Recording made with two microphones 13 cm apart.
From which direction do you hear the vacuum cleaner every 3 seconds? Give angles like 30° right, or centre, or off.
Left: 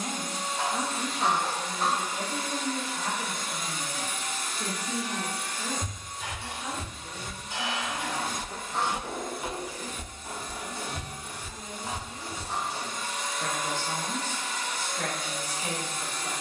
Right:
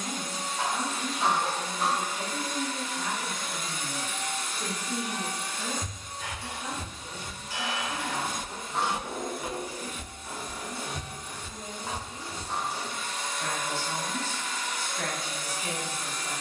30° left, centre, 30° right, 10° right, 20° left, 30° left.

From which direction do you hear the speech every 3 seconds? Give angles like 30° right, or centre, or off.
30° left, 10° left, 10° right, 10° right, 10° left, 20° left.